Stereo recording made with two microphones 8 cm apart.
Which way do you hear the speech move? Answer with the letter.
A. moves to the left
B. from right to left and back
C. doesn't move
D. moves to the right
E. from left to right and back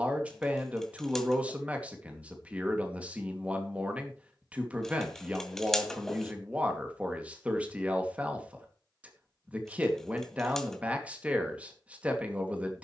C.